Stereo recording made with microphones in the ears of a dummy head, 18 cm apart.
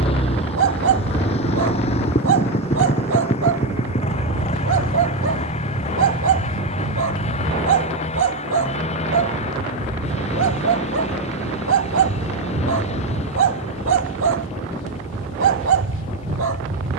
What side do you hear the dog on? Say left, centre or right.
right.